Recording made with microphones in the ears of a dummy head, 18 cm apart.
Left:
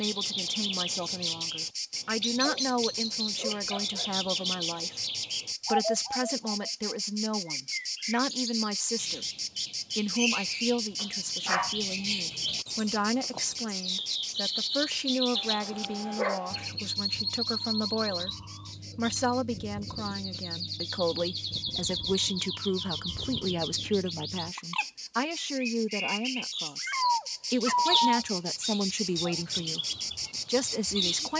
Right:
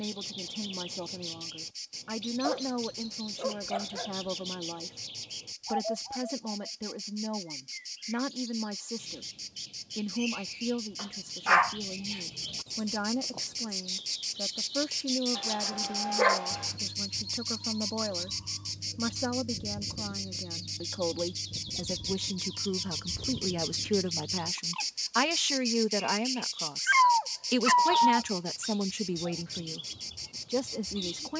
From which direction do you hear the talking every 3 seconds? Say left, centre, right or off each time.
left, left, left, left, left, left, left, left, right, centre, left.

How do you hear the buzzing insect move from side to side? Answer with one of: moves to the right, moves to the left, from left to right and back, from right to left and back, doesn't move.
from left to right and back.